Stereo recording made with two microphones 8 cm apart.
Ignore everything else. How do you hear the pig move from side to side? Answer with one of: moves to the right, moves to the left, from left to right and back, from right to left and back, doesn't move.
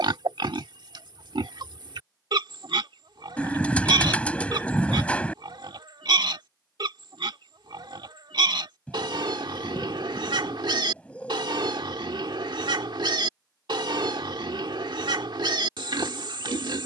doesn't move.